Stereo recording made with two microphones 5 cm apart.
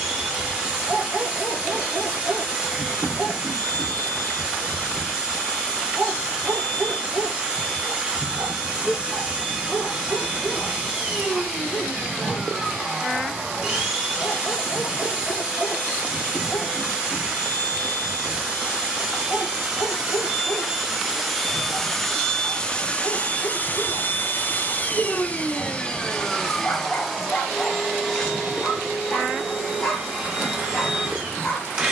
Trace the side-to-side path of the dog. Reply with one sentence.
In this clip you hear the dog travel towards the left.